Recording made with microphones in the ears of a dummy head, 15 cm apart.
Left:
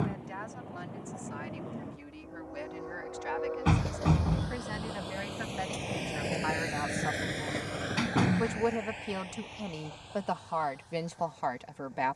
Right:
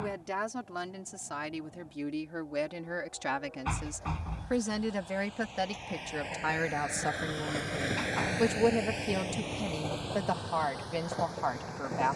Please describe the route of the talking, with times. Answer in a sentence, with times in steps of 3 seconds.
In this clip you hear the talking on the right from 0 s and in the centre from 9 s.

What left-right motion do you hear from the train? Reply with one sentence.
In this clip you hear the train move to the right.